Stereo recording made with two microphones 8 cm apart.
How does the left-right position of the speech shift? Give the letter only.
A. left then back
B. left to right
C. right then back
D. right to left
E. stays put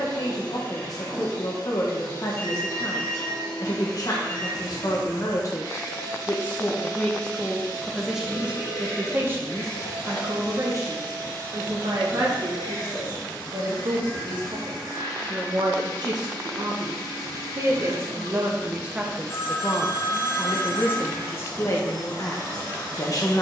C.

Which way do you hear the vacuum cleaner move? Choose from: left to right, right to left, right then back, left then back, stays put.
stays put.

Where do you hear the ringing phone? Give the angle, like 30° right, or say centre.
40° left.